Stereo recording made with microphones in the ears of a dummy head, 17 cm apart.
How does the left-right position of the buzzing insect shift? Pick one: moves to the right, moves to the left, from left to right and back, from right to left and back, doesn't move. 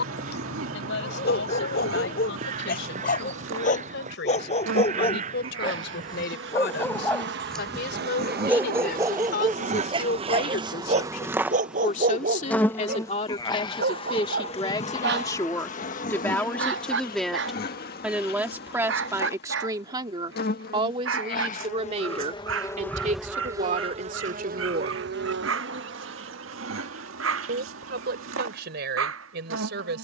from right to left and back.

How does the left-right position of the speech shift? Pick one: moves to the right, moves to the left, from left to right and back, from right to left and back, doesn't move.
moves to the right.